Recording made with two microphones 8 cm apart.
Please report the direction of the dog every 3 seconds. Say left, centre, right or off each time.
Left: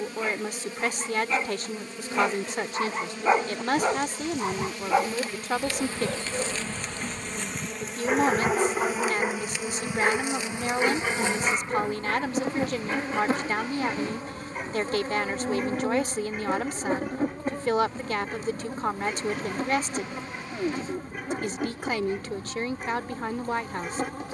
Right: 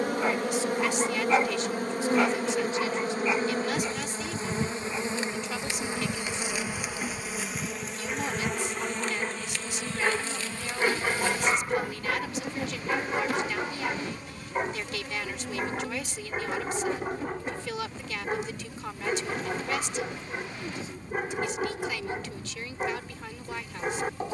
centre, left, left, centre, right, right, right, right.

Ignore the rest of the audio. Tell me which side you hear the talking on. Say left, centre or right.
left.